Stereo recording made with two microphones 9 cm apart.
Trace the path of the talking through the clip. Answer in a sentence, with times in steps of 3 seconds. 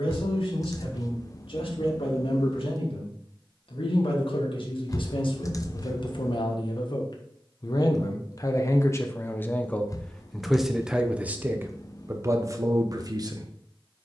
In this clip you hear the talking on the left from 0 s, in the centre from 9 s and on the right from 12 s.